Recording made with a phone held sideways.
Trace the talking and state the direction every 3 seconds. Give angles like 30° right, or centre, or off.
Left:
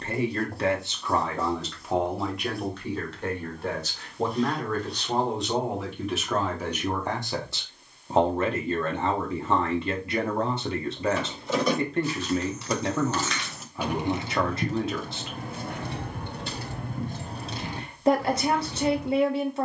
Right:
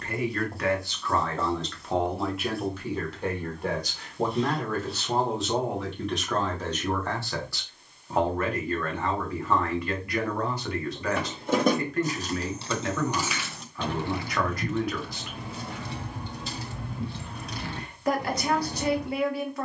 10° left, 10° right, 20° left, 30° left, 30° left, 30° left, 30° left.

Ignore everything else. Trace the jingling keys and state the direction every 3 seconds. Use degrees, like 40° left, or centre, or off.
off, off, off, 50° right, centre, 50° left, 40° right.